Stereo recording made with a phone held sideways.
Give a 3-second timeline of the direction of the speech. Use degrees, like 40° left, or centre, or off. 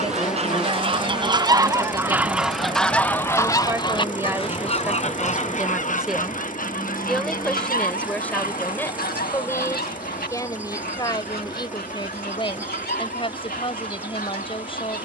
30° right, 10° right, 10° left, 20° left, 30° left.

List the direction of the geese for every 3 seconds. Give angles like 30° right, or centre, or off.
20° right, 40° left, 60° left, 70° left, 80° left.